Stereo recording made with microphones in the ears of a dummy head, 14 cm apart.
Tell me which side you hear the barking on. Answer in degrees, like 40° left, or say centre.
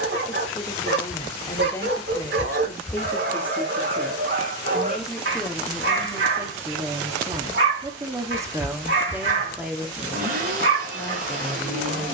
80° right.